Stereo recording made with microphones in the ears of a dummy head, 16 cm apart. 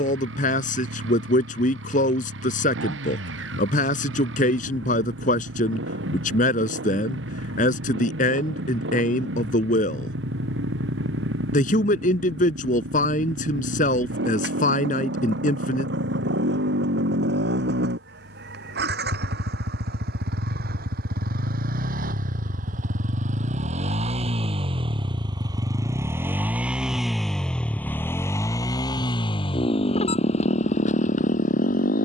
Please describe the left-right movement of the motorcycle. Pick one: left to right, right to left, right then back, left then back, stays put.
right to left.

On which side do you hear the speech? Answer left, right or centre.
left.